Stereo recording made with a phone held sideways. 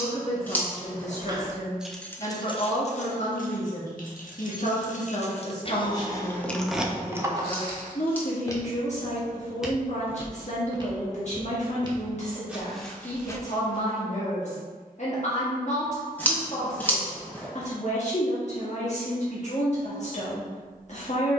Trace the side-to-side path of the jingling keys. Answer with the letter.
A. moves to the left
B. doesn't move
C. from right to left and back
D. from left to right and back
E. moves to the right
C.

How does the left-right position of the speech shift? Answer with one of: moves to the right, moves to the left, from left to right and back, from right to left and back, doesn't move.
doesn't move.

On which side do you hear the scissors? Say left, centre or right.
centre.